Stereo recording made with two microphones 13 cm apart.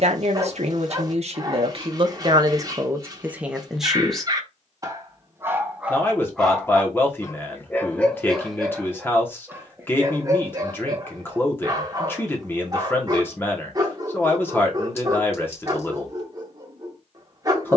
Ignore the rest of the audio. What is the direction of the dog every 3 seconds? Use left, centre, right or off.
right, right, centre, right, right, right.